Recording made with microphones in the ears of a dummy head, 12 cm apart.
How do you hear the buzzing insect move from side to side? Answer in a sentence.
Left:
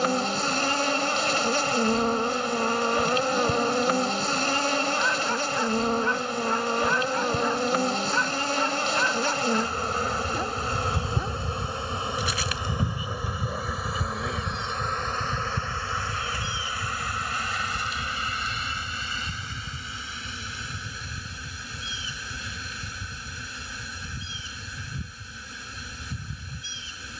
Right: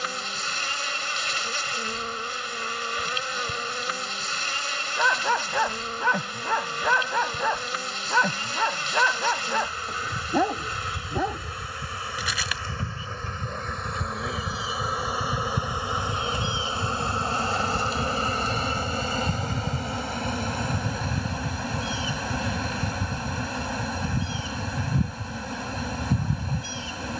You can hear the buzzing insect go from the left side to the right.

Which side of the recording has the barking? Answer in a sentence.
In this clip you hear the barking on the right.